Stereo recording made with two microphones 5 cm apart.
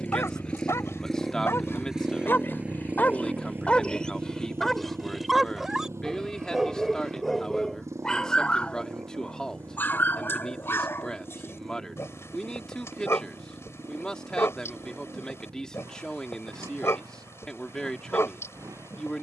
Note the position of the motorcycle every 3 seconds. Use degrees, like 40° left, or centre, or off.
centre, 50° right, 70° right, 80° right, 80° right, 80° right, 80° right.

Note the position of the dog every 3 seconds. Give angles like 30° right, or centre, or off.
60° left, 10° left, 10° left, 50° left, 60° left, 60° left, 60° left.